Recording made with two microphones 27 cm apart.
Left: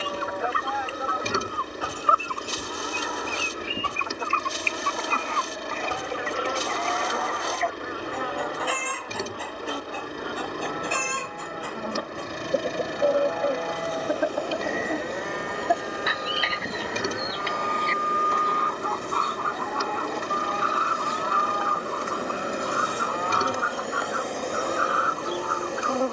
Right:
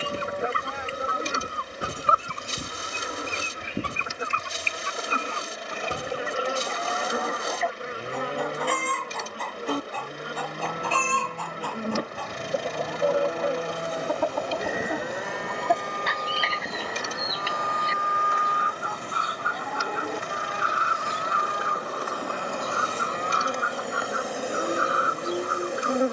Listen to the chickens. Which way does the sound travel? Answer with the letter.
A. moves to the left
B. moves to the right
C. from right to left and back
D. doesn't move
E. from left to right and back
C.